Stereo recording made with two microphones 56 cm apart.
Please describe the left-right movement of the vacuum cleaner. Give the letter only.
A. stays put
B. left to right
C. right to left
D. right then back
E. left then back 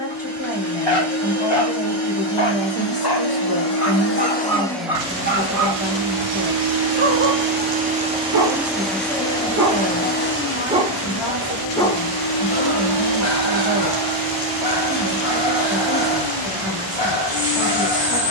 D.